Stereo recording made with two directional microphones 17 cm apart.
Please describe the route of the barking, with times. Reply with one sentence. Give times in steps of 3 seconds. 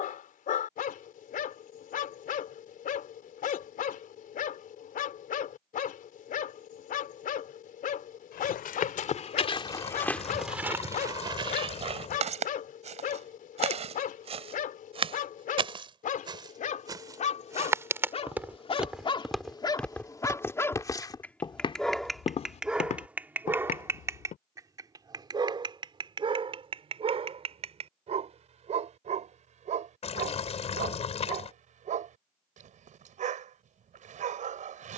In this clip you hear the barking on the left from 0 s, in the centre from 21 s and on the right from 24 s.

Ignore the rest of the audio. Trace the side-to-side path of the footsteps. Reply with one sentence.
In this clip you hear the footsteps move from left to right and back again.